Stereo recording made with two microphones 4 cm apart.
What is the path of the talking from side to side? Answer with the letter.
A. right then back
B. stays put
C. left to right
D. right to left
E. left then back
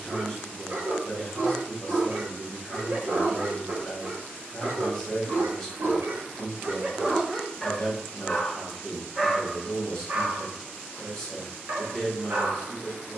B.